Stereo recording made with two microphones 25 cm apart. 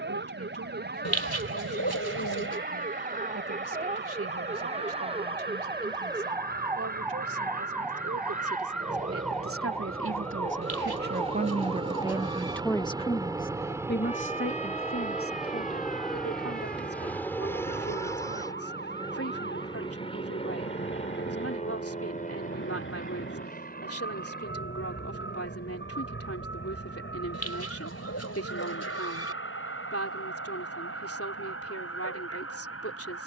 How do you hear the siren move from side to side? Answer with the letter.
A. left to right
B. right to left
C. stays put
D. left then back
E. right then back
B.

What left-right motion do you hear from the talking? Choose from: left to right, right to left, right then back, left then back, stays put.
right to left.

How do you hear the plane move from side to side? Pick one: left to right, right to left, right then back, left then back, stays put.
right to left.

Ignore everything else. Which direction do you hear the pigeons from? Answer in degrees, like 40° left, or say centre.
80° left.